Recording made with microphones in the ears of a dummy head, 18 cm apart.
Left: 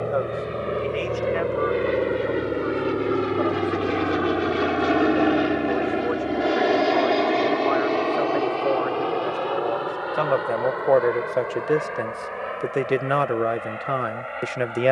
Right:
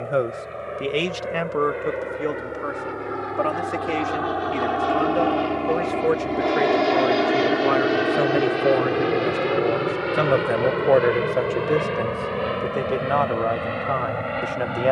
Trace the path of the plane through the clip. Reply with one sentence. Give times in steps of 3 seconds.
In this clip you hear the plane on the left from 0 s, in the centre from 6 s and on the right from 9 s.